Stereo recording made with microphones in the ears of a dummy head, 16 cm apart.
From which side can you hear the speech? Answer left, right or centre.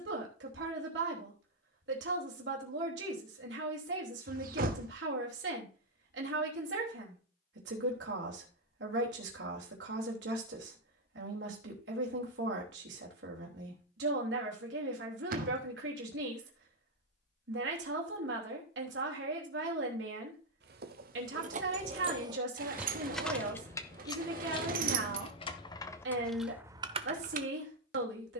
right.